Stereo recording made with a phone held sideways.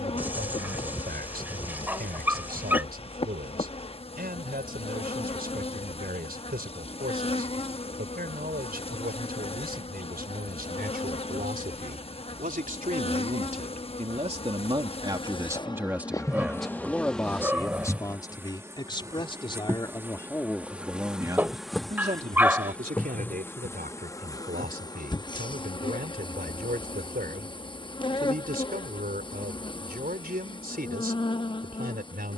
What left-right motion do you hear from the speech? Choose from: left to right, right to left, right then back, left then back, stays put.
left then back.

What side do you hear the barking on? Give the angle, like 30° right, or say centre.
10° right.